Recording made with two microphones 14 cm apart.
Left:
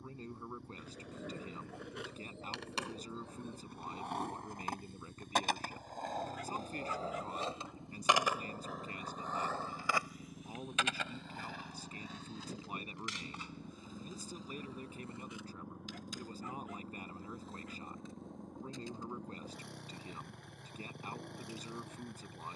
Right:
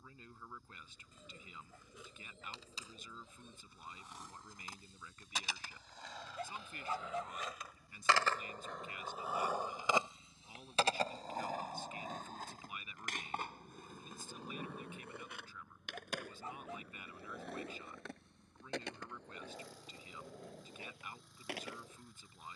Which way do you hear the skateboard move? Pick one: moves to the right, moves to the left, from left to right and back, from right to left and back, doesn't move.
moves to the right.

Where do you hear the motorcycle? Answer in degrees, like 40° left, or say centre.
70° left.